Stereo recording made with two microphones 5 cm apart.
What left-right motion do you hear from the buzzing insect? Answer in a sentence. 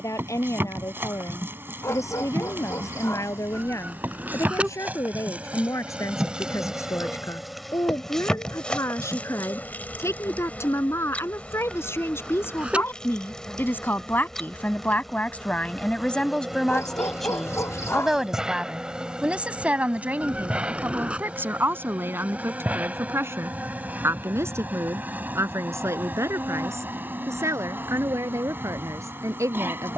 You can hear the buzzing insect move from right to left and back again.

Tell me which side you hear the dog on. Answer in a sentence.
In this clip you hear the dog on the left.